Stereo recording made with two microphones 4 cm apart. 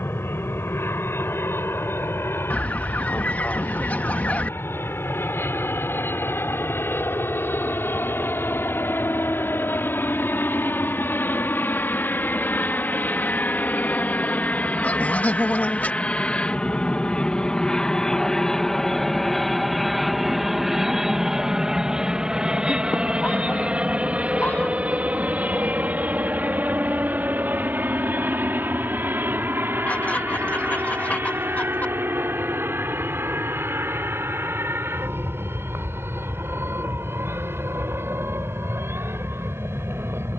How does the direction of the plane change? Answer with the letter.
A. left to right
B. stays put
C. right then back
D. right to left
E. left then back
A.